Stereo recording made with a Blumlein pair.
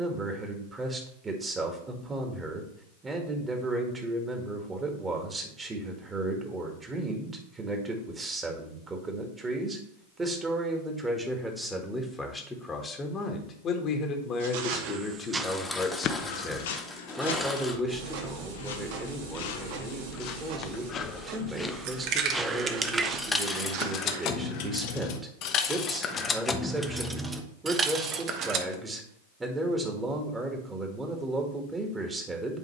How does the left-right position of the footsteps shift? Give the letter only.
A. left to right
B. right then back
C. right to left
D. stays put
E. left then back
E.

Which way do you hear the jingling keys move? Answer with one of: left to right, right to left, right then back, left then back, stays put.
left then back.